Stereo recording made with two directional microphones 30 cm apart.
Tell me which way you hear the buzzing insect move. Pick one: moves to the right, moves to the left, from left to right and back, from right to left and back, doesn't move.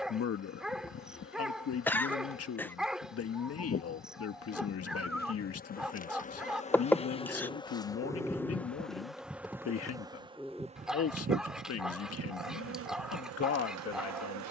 moves to the right.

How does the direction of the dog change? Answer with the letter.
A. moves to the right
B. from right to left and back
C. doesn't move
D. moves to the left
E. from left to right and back
C.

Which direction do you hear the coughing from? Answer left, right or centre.
centre.